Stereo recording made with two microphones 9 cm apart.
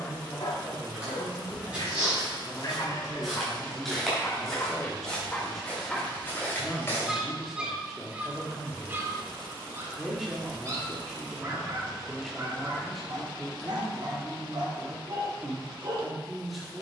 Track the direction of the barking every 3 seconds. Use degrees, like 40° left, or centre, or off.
50° left, 20° left, 10° right, 30° right, 50° right, 50° right.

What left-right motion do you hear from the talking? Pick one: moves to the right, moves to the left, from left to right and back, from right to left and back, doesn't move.
doesn't move.